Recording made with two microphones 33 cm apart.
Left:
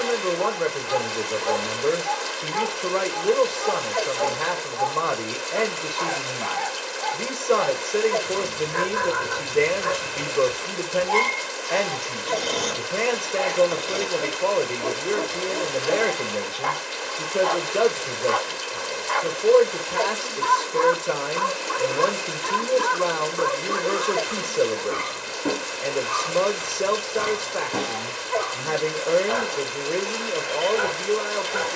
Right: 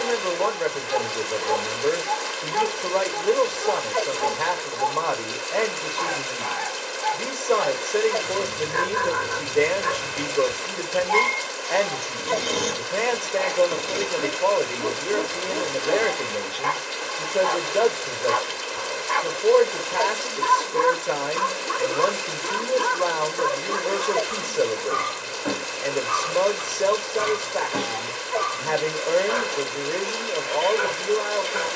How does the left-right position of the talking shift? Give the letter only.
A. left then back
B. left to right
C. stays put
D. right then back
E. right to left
C.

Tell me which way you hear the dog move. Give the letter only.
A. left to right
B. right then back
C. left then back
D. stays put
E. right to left
E.